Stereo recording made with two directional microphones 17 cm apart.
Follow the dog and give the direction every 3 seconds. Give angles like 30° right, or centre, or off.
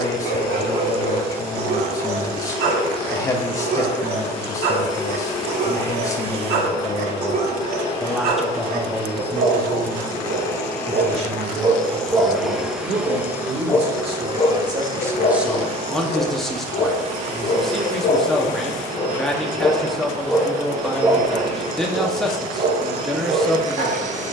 70° right, 70° right, 70° right, 40° right, 10° left, 40° left, 20° left, 50° right.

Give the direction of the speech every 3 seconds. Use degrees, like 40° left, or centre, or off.
20° left, 20° left, 10° left, 30° right, 40° right, centre, centre, centre.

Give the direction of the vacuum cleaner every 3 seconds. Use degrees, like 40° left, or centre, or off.
30° left, 30° left, 30° left, 20° left, 10° right, 40° right, 40° right, 40° right.